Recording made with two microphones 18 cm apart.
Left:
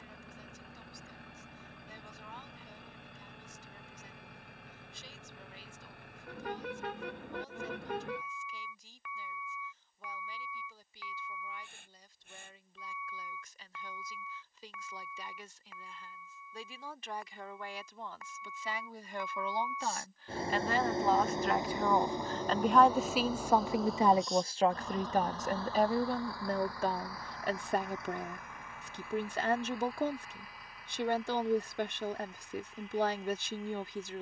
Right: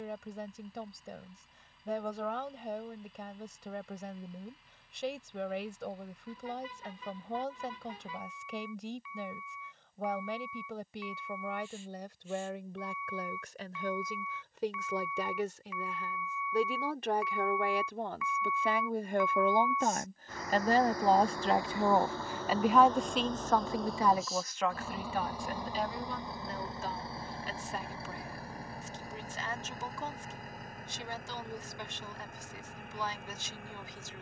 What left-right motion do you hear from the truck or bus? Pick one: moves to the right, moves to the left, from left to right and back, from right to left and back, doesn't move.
moves to the right.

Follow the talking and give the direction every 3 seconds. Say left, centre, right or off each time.
right, right, right, right, right, right, right, centre, left, left, left, left.